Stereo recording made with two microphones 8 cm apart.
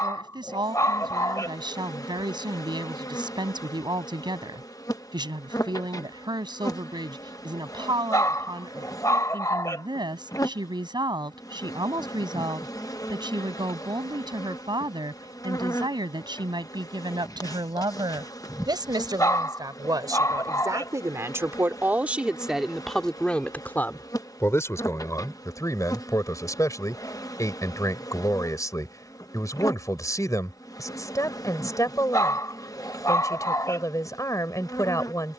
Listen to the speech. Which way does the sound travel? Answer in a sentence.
You can hear the speech travel towards the left.